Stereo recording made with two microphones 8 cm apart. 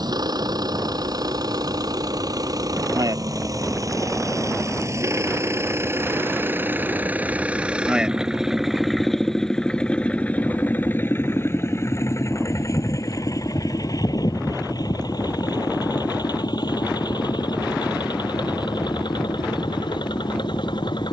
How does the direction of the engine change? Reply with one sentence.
In this clip you hear the engine go from the right side to the left.